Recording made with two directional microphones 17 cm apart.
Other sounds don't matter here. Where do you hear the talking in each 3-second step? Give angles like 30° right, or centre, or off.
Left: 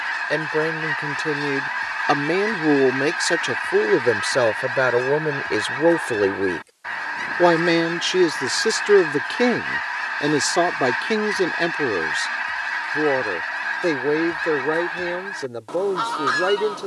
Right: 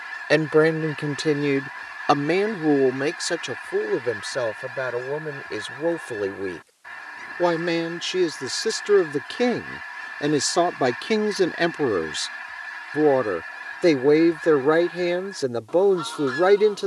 20° right, 40° left, 30° left, centre, 20° right, 30° right.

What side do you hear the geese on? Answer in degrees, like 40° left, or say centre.
50° left.